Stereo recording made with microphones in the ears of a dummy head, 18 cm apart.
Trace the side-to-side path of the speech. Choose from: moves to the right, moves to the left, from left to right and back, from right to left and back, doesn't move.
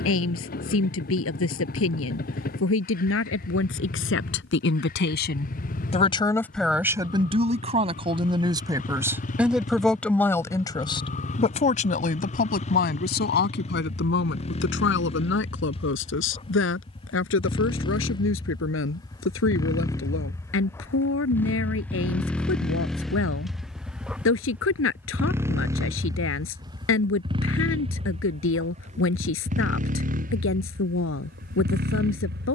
from left to right and back.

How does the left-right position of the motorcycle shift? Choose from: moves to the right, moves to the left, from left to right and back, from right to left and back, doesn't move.
moves to the right.